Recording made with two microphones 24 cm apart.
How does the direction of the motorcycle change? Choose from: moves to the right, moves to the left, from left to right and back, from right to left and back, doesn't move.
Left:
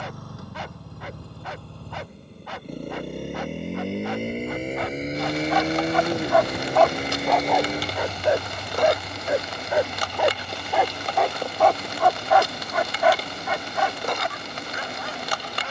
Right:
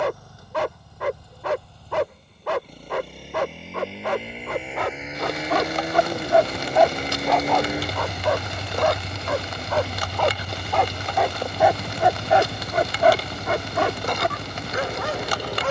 moves to the right.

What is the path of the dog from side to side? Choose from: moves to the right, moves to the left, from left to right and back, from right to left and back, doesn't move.
from right to left and back.